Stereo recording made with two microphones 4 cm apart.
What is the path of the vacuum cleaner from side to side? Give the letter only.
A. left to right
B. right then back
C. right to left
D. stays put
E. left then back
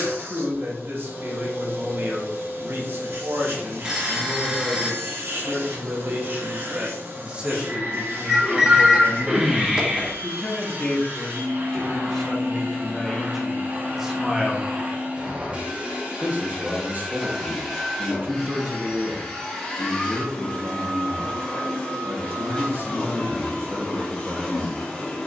C.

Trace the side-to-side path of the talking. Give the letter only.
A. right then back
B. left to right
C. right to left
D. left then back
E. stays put
D.